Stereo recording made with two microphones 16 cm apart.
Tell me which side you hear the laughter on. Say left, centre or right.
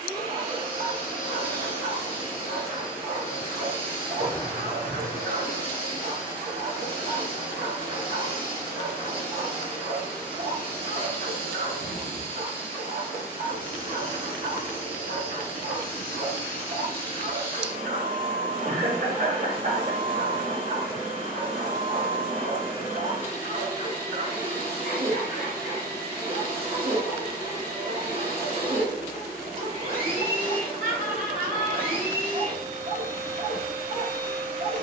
right.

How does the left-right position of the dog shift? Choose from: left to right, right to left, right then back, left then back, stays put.
stays put.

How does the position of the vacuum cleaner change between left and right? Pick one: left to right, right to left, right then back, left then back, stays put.
stays put.